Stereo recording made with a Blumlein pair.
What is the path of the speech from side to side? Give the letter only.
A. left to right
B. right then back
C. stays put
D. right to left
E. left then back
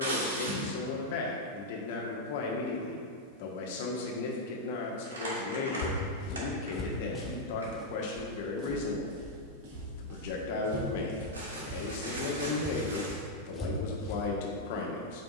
C.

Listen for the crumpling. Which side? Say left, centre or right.
right.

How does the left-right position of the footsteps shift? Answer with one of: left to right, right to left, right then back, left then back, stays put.
right then back.